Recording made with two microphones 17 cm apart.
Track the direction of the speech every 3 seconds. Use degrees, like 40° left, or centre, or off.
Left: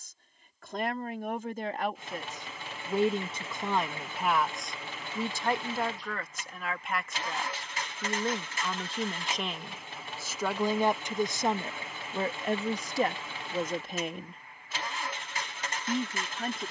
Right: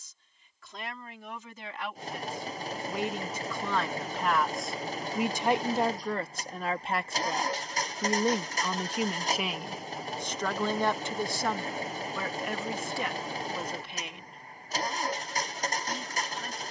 50° left, centre, 30° right, 10° left, 40° left, 60° left.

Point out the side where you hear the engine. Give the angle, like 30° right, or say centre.
40° right.